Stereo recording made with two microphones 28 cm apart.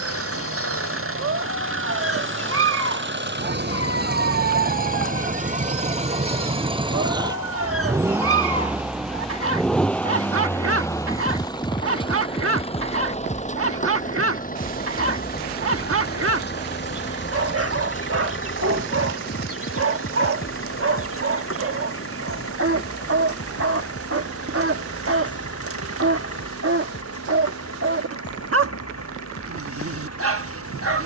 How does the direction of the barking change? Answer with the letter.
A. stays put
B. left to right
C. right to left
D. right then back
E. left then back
A.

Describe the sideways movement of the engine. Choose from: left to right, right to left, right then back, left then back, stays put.
right to left.